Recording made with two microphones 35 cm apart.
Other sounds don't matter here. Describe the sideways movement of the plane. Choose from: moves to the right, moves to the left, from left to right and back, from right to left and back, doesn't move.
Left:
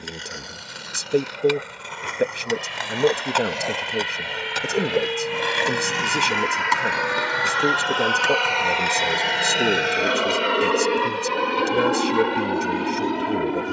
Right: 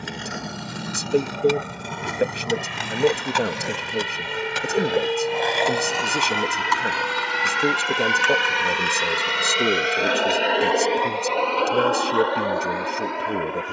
moves to the left.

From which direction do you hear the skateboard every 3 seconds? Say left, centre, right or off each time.
right, centre, left, left, off.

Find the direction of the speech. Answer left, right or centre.
centre.